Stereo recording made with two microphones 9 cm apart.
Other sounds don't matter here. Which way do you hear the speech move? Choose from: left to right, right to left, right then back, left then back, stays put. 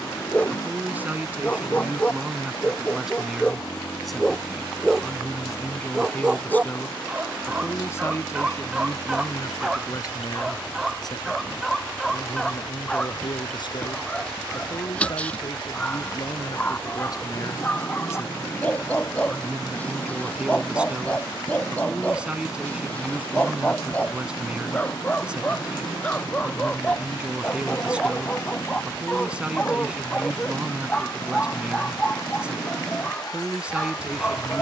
left then back.